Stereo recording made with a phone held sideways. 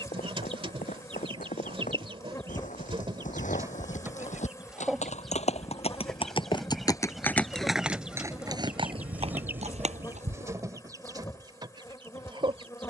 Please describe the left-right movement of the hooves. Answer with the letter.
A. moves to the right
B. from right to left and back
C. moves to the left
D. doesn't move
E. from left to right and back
A.